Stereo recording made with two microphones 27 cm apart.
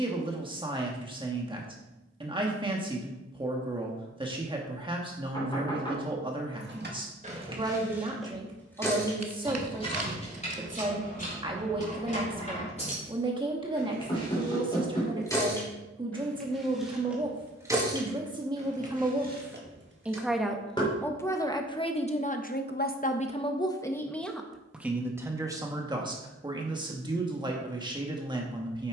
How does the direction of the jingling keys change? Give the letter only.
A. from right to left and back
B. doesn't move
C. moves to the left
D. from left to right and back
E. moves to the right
A.